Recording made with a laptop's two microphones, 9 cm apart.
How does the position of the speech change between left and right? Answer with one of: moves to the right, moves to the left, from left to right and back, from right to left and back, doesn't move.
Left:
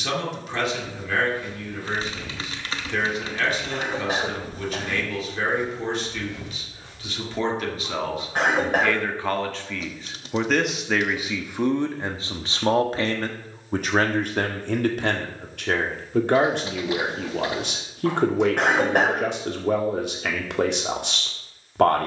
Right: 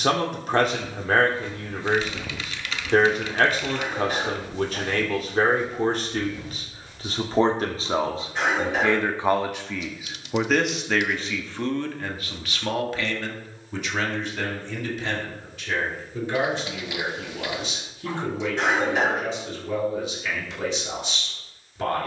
moves to the left.